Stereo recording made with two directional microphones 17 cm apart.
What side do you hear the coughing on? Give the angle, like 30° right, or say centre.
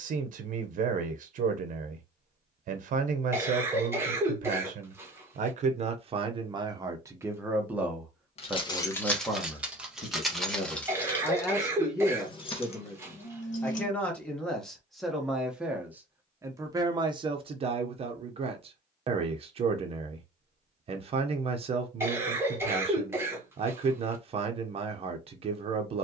10° right.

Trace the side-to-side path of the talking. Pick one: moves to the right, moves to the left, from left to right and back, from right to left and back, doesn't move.
from right to left and back.